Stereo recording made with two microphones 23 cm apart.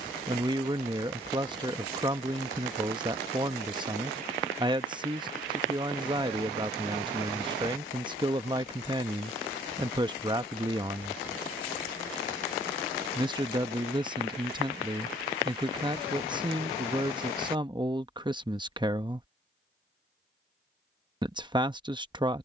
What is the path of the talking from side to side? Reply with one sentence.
You can hear the talking stay in one place.